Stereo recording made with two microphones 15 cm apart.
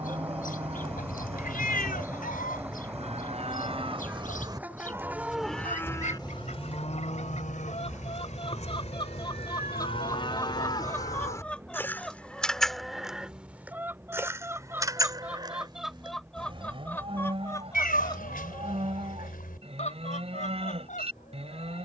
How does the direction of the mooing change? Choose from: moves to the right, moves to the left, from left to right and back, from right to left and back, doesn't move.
from right to left and back.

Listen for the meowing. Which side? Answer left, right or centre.
left.